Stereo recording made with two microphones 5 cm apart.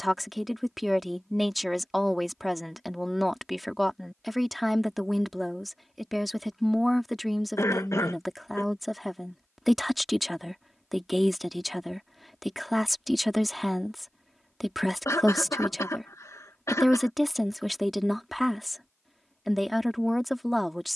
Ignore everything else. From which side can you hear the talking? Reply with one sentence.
You can hear the talking in the centre.